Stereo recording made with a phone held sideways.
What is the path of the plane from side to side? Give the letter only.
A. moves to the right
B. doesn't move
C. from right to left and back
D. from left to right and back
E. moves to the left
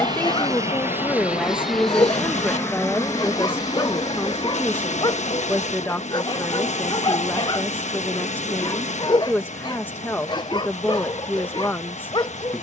E.